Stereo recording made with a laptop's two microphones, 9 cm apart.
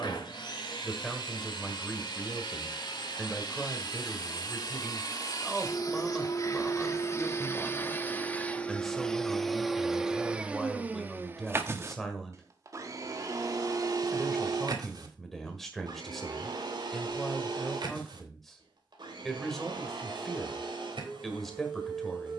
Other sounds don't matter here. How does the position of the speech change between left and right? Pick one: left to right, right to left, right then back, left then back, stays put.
stays put.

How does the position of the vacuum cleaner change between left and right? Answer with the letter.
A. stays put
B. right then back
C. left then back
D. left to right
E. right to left
D.